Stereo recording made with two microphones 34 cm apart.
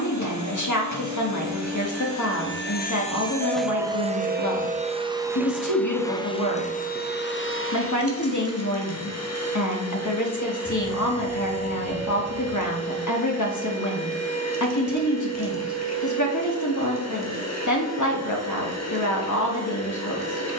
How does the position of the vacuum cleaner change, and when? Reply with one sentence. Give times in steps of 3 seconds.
You can hear the vacuum cleaner on the left from 0 s, in the centre from 3 s and on the left from 6 s.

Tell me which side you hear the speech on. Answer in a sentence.
You can hear the speech on the left.